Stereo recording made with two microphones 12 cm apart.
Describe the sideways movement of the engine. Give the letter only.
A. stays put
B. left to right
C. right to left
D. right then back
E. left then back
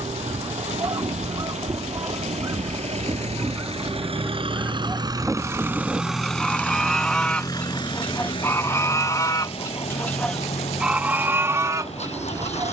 C.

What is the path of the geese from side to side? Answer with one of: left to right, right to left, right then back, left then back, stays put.
left then back.